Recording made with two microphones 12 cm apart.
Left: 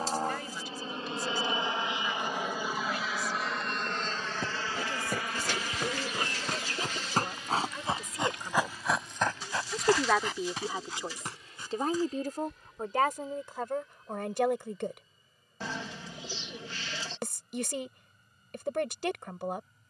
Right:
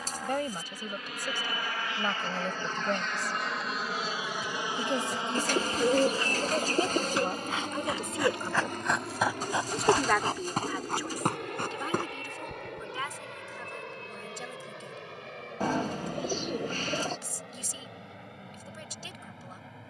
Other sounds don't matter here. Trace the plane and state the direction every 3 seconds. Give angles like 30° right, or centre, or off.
30° left, 10° right, 40° right, 60° right, 70° right, 70° right, 70° right.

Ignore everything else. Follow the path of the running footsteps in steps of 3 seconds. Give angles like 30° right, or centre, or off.
off, 60° left, 30° left, 40° right, 70° right, off, off.